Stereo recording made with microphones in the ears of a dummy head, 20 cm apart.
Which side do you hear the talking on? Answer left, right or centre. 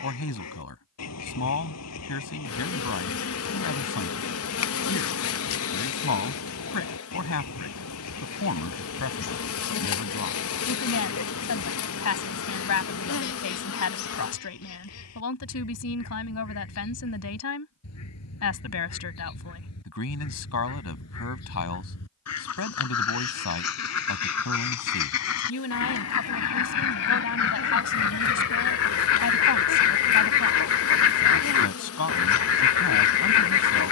left.